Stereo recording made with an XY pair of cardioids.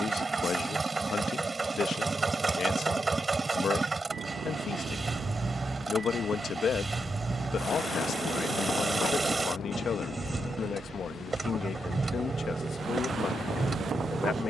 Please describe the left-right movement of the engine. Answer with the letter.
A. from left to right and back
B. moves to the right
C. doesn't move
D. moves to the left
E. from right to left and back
C.